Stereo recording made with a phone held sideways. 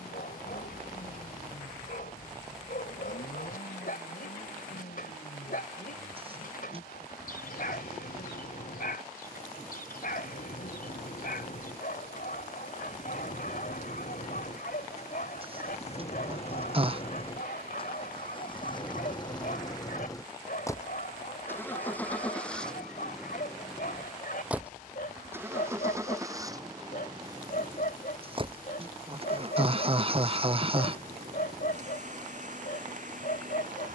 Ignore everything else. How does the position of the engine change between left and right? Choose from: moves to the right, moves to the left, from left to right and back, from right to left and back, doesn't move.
moves to the right.